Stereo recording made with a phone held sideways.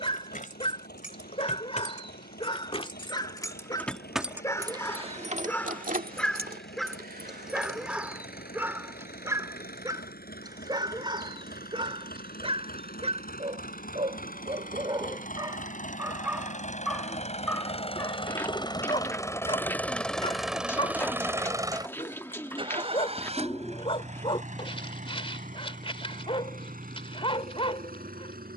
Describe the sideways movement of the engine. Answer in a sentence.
You can hear the engine travel towards the right.